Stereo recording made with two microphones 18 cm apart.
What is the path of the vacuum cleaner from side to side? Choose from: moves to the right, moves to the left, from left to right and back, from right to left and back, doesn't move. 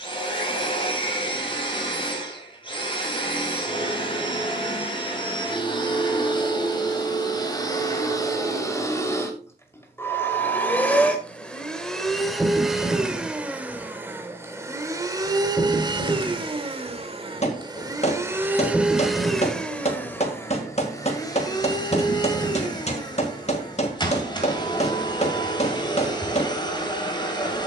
from left to right and back.